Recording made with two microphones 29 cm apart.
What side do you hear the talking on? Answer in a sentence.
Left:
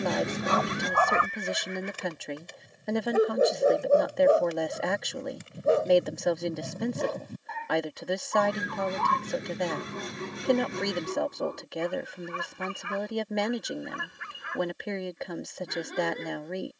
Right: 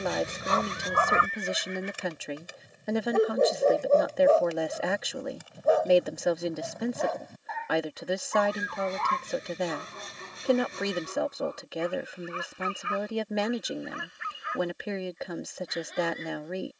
In this clip you hear the talking in the centre.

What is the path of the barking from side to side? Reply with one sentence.
In this clip you hear the barking move to the left.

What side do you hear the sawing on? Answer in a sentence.
In this clip you hear the sawing on the left.